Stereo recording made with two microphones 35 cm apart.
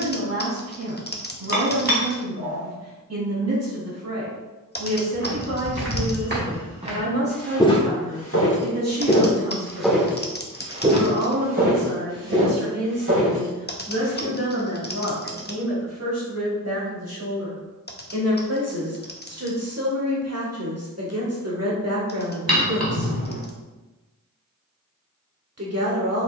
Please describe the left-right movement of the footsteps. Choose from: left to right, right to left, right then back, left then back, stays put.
left then back.